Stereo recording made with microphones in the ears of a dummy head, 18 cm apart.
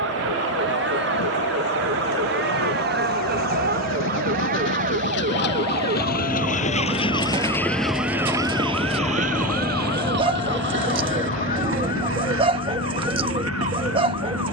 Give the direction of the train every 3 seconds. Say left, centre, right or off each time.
left, left, centre, right, right.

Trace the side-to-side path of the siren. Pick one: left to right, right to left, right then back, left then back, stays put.
right to left.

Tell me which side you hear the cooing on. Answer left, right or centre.
right.